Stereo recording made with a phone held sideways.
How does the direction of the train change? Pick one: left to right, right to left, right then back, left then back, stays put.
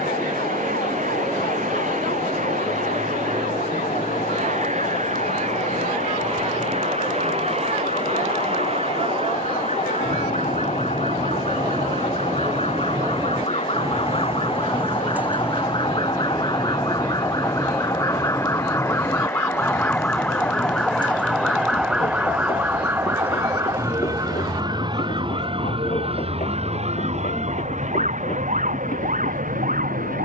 right to left.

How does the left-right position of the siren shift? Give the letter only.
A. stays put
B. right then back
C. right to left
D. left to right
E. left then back
D.